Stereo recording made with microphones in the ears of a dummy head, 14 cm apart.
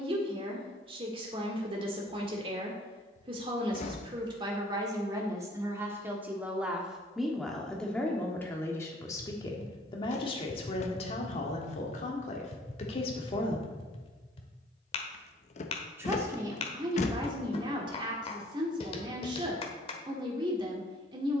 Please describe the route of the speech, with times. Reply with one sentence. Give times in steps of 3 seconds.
In this clip you hear the speech on the right from 0 s, in the centre from 6 s, on the left from 9 s and on the right from 15 s.